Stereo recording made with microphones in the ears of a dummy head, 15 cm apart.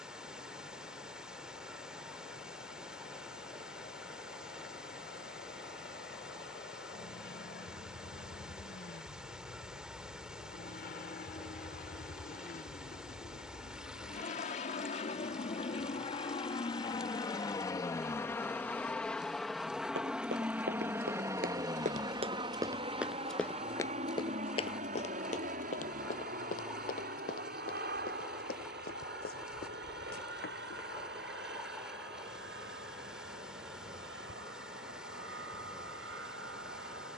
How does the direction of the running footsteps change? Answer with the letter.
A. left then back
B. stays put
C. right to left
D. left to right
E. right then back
C.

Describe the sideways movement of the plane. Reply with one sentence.
In this clip you hear the plane go from the left side to the right.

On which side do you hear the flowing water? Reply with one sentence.
In this clip you hear the flowing water in the centre.